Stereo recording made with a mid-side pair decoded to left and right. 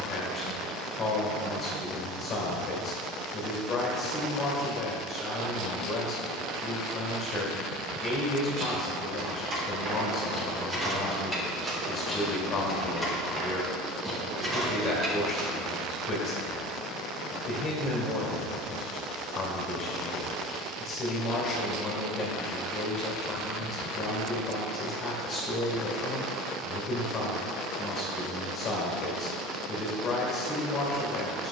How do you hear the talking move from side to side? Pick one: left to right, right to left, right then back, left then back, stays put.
stays put.